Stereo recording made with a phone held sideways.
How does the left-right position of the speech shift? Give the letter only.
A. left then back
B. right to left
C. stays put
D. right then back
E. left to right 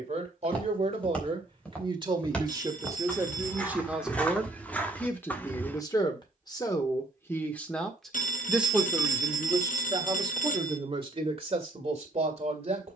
A.